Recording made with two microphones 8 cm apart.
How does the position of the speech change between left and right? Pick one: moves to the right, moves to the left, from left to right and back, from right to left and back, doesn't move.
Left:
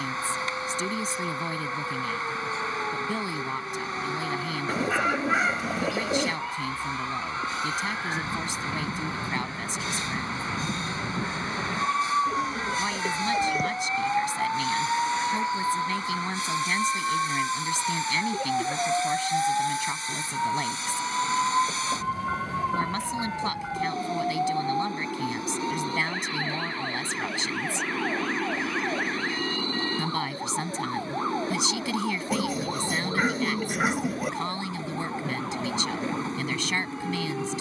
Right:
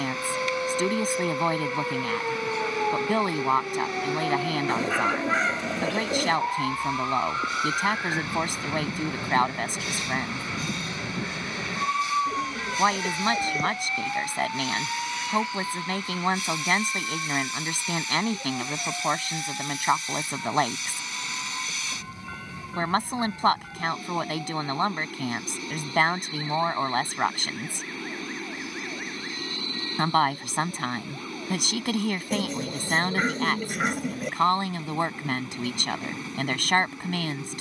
doesn't move.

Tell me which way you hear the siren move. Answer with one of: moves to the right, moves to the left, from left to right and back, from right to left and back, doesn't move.
moves to the left.